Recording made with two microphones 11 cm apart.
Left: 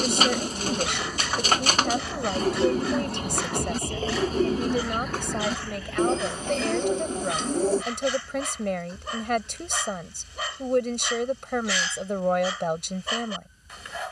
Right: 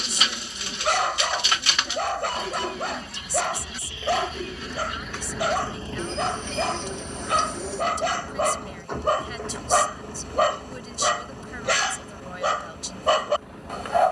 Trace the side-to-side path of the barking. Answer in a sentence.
You can hear the barking stay in one place.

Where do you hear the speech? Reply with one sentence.
You can hear the speech on the left.